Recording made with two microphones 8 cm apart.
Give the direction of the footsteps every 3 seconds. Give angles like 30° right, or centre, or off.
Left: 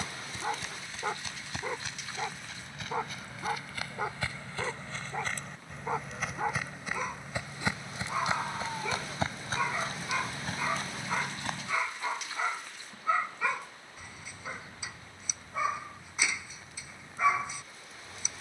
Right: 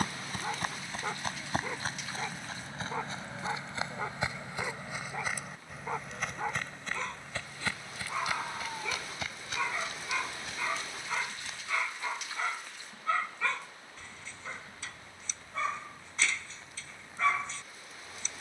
40° right, 20° right, 10° left, 40° left, off, off.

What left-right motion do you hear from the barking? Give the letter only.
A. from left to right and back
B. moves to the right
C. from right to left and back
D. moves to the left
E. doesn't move
E.